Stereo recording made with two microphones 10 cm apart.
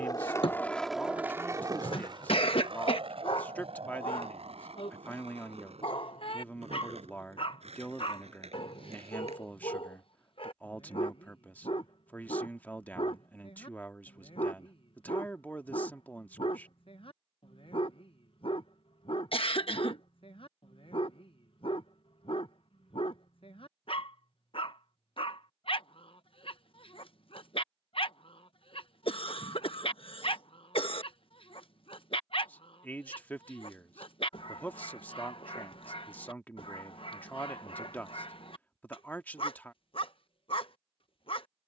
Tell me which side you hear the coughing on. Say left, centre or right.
left.